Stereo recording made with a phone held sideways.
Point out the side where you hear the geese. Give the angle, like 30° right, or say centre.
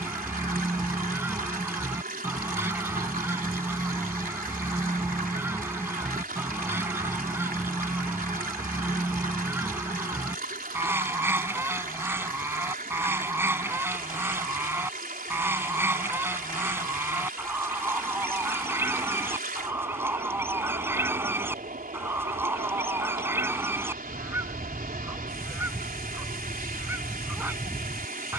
10° right.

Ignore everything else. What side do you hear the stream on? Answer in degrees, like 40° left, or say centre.
70° right.